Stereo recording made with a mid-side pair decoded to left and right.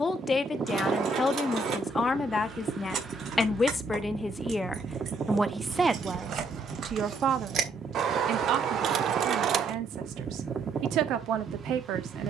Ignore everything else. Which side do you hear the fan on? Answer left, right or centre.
right.